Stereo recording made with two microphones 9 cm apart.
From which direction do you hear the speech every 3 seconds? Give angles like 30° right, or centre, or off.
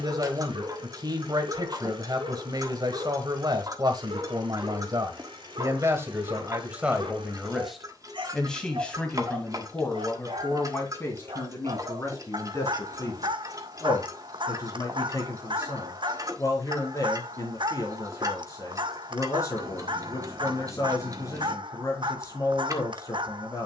50° right, 50° right, 10° right, 20° left, 30° left, 40° left, 40° left, 40° left.